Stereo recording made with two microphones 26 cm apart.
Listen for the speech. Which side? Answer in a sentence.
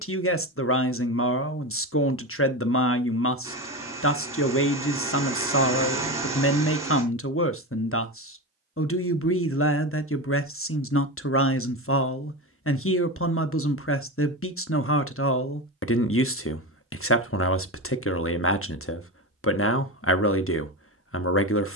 In this clip you hear the speech on the left.